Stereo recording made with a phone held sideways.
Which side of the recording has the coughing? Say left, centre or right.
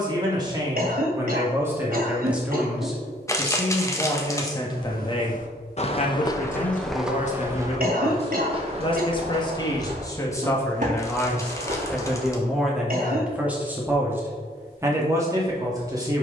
right.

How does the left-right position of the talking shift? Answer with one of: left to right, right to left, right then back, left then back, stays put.
left then back.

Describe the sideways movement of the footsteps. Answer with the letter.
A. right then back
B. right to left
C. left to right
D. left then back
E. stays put
C.